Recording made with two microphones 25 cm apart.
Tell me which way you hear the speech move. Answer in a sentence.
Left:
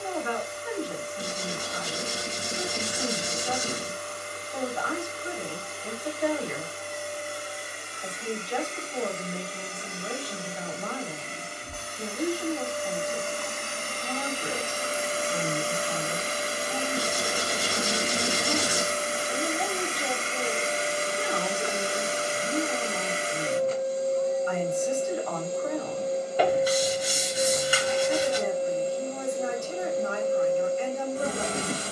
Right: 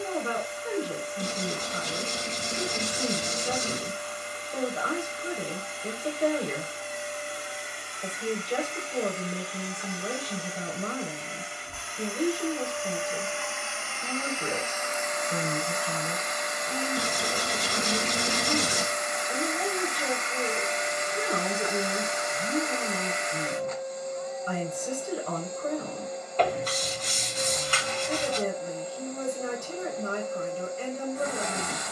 In this clip you hear the speech stay in one place.